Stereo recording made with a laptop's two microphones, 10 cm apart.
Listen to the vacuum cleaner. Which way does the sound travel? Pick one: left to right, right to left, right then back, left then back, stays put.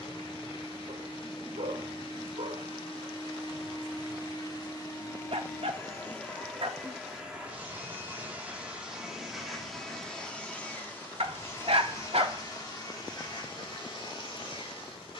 right then back.